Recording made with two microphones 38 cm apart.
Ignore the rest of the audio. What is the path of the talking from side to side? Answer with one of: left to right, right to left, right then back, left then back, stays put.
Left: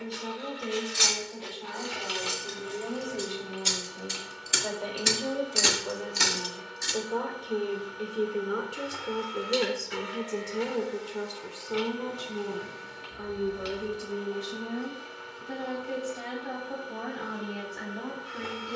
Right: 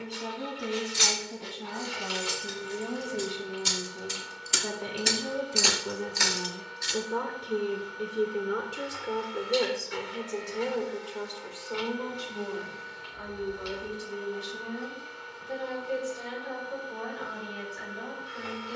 right to left.